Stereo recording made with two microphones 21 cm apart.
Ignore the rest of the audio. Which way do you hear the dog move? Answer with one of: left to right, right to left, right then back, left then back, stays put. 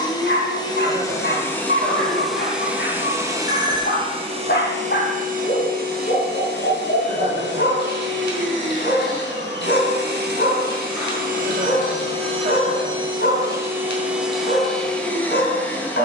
stays put.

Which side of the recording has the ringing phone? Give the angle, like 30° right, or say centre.
centre.